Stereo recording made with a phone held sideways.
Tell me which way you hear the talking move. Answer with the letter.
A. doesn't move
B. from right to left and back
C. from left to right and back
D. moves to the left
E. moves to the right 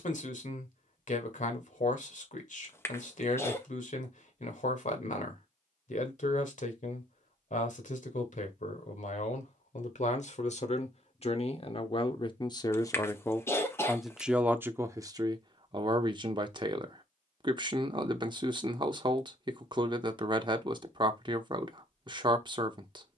E.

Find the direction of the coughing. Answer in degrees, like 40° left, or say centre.
20° left.